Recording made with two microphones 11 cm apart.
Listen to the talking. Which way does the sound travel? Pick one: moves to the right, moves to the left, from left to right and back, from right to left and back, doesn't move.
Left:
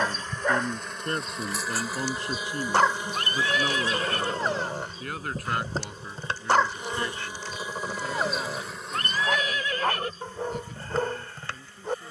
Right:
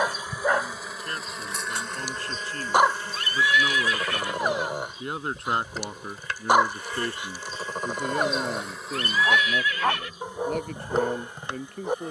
moves to the right.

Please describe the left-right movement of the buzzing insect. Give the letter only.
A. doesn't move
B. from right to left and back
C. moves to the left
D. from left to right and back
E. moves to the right
B.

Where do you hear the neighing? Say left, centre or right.
left.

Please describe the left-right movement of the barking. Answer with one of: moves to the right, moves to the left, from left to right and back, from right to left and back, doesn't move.
doesn't move.